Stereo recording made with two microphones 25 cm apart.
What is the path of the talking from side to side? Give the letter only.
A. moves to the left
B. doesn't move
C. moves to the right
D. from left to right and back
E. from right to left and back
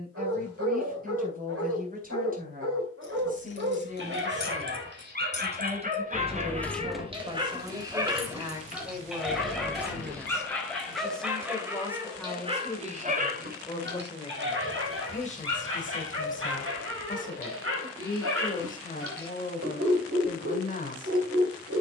A.